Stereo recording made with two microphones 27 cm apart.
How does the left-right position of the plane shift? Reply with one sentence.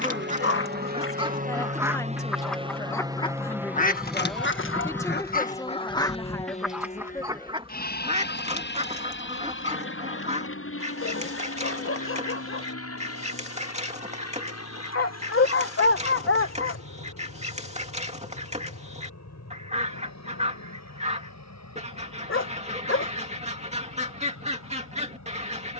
In this clip you hear the plane move to the left.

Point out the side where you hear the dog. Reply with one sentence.
In this clip you hear the dog on the left.